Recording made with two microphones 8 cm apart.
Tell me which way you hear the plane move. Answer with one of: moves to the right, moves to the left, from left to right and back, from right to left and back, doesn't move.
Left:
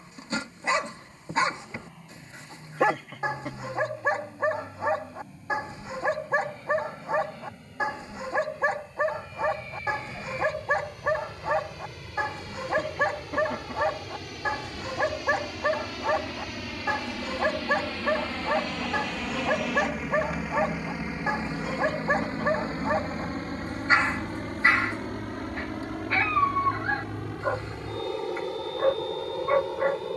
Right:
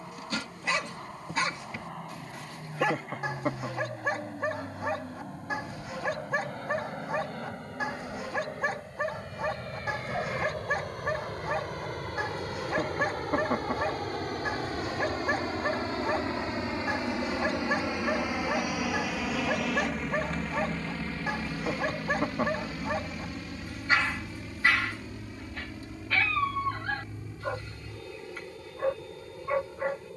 moves to the left.